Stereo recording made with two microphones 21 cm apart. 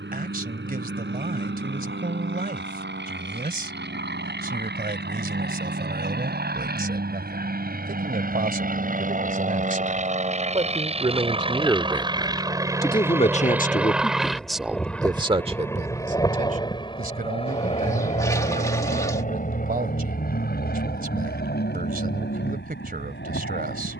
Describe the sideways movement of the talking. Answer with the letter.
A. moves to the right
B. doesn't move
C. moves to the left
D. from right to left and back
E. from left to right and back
D.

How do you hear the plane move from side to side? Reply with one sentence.
In this clip you hear the plane move to the left.